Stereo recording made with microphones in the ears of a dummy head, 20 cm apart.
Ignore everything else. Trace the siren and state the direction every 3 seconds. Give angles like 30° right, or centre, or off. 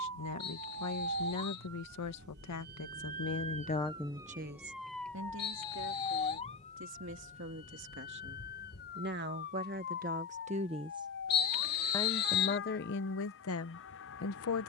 60° right, 10° right, 40° left, 50° left, 60° left.